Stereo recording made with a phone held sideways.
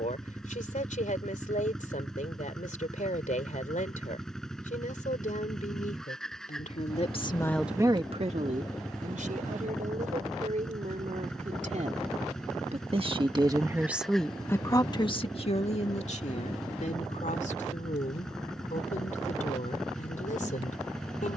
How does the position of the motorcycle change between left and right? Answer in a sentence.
In this clip you hear the motorcycle stay put.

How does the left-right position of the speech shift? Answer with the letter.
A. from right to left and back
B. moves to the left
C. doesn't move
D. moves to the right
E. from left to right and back
E.